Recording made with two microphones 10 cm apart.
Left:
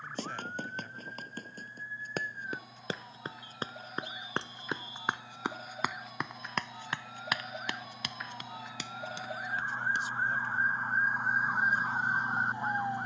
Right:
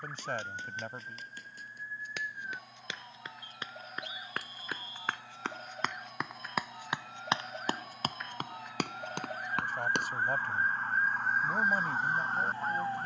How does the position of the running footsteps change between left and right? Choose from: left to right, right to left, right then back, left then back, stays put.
left to right.